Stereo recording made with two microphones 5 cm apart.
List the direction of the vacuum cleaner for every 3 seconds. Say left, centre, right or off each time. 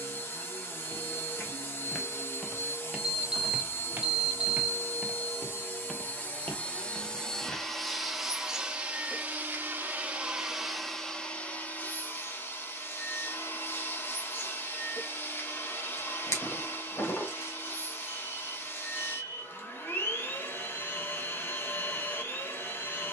left, left, centre, centre, left, left, left, left.